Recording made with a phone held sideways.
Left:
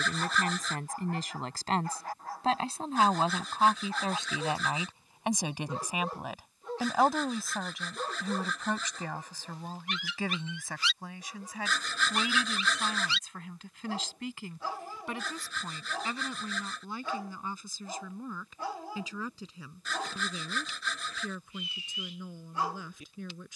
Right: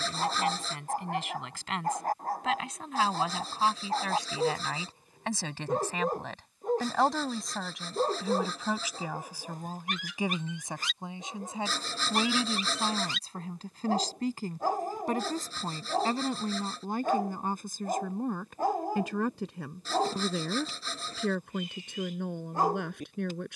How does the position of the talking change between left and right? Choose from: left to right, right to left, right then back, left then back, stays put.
left to right.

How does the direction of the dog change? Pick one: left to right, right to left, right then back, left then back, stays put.
stays put.